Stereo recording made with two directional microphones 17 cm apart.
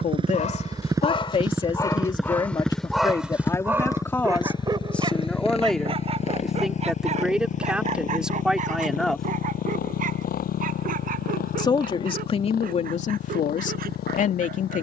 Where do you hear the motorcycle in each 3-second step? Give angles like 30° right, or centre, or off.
10° right, 20° left, 50° left, 60° left, 60° left.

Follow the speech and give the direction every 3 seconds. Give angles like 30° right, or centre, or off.
30° left, 10° left, centre, 20° left, 40° left.